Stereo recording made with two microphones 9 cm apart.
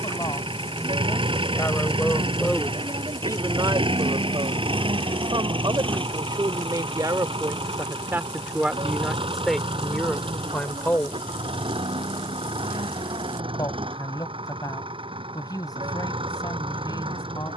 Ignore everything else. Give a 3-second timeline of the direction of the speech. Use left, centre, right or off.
left, right, right, centre, left, left.